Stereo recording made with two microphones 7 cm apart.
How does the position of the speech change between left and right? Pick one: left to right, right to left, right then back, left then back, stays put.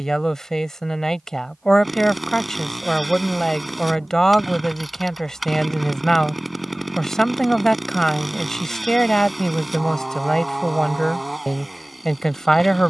stays put.